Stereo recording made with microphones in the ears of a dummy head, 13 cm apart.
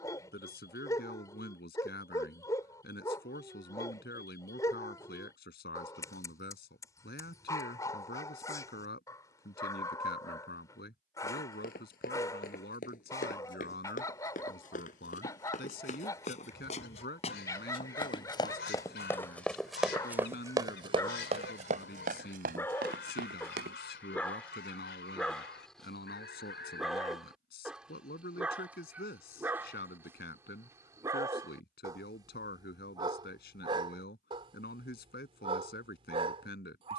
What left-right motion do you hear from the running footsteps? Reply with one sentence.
You can hear the running footsteps travel towards the right.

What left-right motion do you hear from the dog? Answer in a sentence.
In this clip you hear the dog travel towards the right.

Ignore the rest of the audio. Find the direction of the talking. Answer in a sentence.
In this clip you hear the talking on the left.